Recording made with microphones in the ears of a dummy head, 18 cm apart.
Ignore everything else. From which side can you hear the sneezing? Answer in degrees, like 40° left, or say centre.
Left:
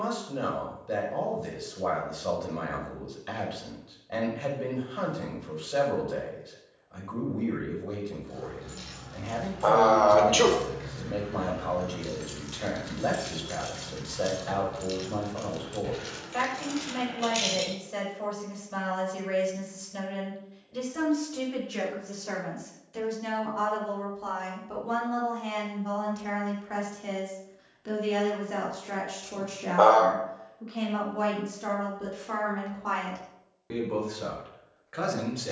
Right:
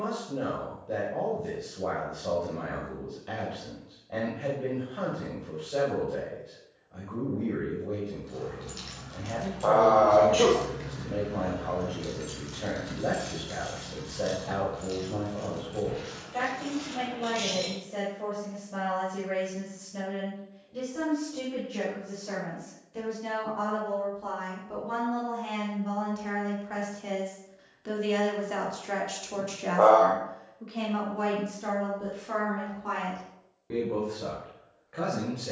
80° left.